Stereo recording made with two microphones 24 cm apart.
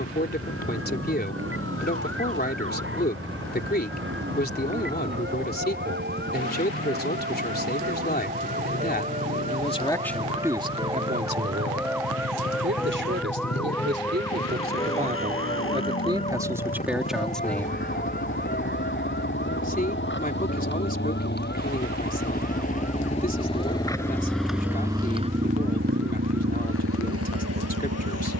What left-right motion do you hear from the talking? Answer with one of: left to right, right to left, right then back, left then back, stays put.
right then back.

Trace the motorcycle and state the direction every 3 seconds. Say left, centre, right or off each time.
left, left, left, left, left, left, left, left, right, right.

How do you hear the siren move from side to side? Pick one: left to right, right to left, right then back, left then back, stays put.
right to left.